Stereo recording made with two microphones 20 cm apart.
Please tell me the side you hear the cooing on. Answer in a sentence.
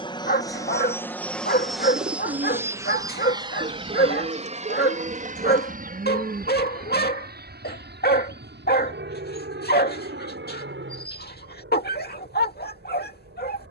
You can hear the cooing on the right.